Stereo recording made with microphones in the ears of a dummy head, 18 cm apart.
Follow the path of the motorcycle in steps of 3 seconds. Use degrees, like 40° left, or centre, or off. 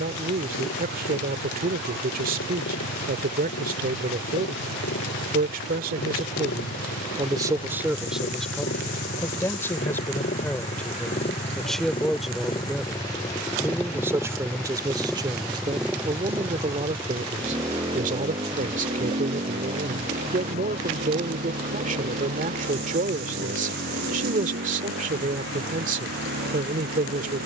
70° left, 60° left, 50° left, 40° left, 10° left, 10° right, 30° right, 40° right, 50° right.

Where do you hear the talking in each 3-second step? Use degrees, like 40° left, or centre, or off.
50° right, 50° right, 20° right, 10° left, 10° right, 30° right, 40° right, 40° right, 40° right.